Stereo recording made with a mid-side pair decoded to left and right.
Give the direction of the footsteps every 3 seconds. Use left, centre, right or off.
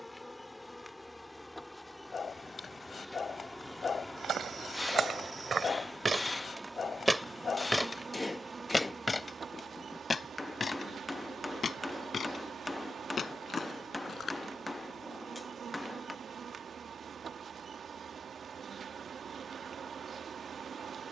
off, right, centre, left, left, off, off.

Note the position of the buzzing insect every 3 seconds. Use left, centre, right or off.
centre, centre, right, right, right, right, right.